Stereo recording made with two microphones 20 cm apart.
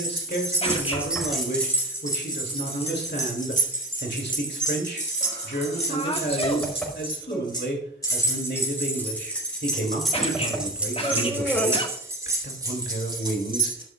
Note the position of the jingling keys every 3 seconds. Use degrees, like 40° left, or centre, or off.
centre, 40° left, 20° left, centre, 20° right.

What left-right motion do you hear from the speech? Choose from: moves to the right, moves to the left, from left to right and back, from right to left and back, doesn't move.
doesn't move.